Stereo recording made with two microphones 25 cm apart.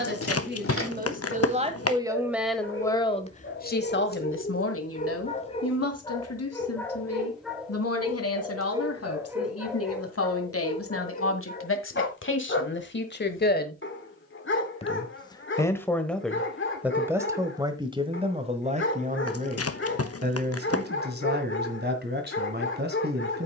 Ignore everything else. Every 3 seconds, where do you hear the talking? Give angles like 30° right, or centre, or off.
20° right, 50° left, 70° left, 60° left, 40° left, centre, 30° right, 40° right.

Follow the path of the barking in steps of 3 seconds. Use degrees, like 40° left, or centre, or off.
60° left, 30° left, centre, 10° left, 50° left, 50° left, 50° left, 50° left.